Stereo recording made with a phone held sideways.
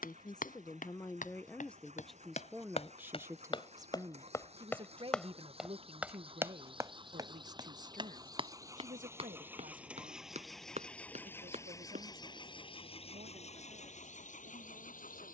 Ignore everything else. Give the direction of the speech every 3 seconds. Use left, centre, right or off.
centre, right, right, right, right.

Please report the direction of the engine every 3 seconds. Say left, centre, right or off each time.
right, right, right, centre, left.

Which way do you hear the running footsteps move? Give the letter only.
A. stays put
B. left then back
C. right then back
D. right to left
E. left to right
E.